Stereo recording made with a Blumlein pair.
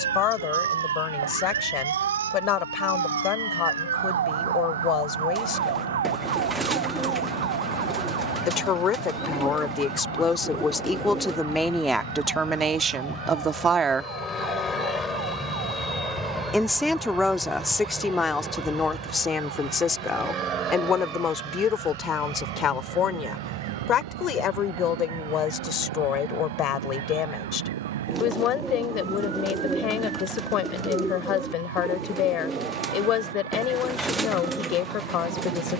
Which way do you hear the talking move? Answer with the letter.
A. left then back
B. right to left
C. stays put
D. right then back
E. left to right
D.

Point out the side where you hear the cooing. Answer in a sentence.
In this clip you hear the cooing in the centre.